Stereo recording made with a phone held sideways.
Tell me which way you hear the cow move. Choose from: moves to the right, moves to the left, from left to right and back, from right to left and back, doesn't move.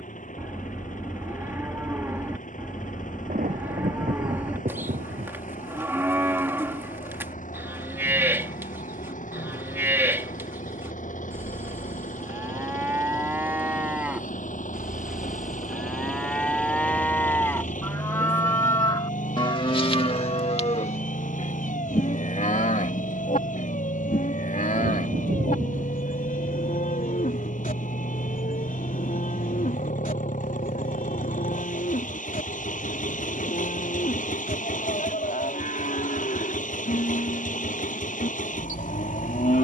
moves to the left.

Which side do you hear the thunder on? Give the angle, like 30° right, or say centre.
90° right.